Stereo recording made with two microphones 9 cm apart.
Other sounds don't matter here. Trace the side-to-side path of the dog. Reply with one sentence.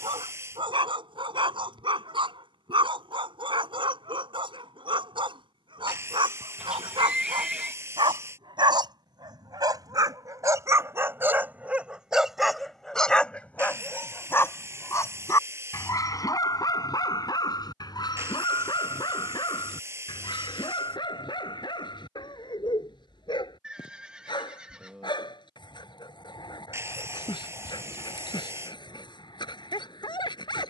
In this clip you hear the dog move to the left.